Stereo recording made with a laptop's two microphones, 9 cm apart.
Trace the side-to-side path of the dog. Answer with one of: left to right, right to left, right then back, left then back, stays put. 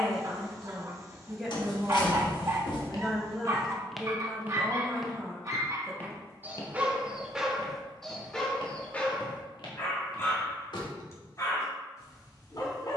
right to left.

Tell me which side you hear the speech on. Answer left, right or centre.
centre.